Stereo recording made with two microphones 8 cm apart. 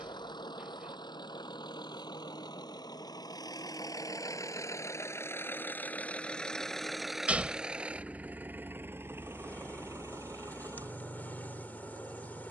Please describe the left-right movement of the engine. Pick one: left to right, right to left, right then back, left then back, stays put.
left to right.